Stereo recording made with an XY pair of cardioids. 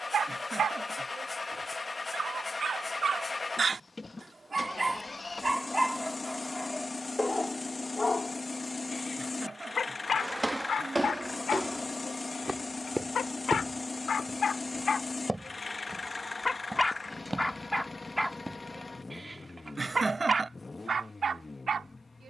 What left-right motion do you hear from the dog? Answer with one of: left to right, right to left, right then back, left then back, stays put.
left then back.